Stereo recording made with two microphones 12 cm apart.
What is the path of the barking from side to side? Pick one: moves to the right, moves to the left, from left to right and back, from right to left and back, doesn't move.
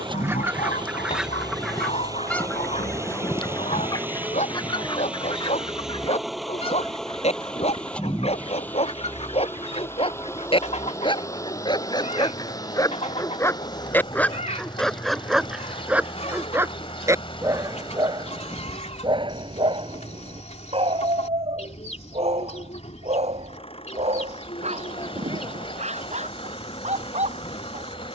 moves to the right.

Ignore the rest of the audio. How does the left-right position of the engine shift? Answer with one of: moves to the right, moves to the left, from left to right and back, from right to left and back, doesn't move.
moves to the left.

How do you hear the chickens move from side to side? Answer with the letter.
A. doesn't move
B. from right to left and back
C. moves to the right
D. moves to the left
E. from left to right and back
D.